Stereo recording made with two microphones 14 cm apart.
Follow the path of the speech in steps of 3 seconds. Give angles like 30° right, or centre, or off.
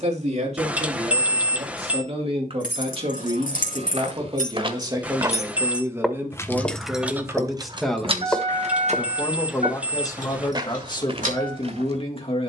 50° right, 30° right, centre, 30° left.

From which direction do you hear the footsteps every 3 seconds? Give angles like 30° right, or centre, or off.
off, 40° right, 20° left, 40° right.